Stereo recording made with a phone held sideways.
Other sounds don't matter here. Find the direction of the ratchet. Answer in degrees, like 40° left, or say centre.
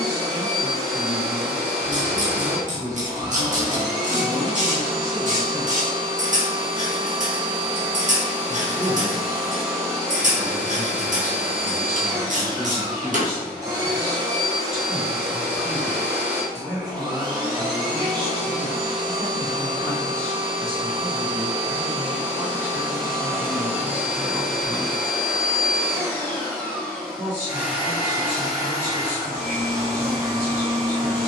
50° right.